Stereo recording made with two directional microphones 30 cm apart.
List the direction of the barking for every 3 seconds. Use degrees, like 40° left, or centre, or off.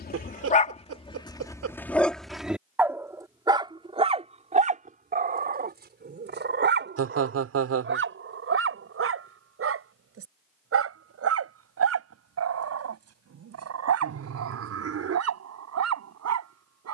10° left, 20° right, 40° right, 50° right, 50° right, 60° right.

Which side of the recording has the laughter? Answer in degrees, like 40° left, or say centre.
50° right.